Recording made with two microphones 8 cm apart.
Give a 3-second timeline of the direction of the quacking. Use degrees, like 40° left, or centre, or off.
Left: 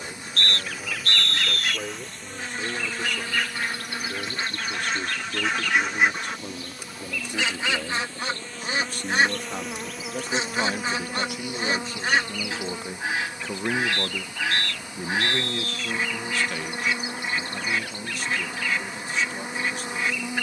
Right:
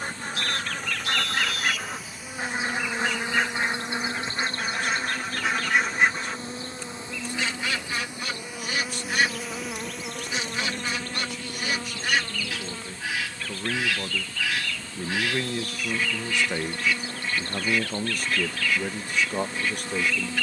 40° right, 10° right, 20° left, 30° left, 30° left, 30° left, 30° left.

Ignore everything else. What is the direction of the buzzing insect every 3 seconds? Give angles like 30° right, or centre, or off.
centre, 30° right, 20° right, 10° left, 20° left, 20° left, 20° left.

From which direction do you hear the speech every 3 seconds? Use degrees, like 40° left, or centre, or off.
70° left, 60° left, 60° left, 50° left, 20° left, 20° right, 50° right.